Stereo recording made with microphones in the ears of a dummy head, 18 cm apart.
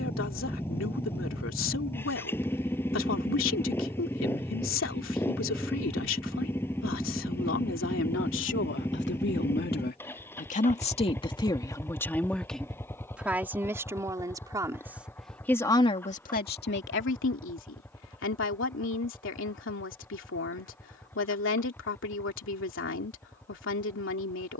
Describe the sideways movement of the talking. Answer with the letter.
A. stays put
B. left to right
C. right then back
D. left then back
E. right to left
C.